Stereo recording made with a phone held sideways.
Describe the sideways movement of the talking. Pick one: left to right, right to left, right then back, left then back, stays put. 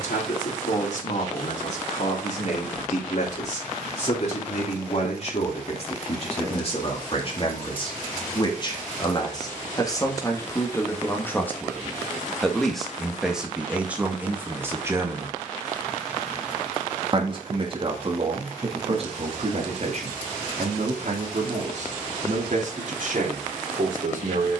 left to right.